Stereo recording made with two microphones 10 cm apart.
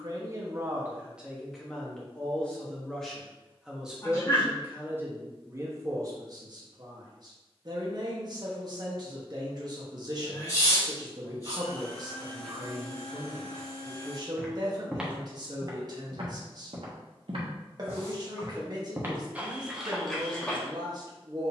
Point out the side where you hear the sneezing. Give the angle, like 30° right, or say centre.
30° left.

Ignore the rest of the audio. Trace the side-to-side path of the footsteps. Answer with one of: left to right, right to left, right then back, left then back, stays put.
right then back.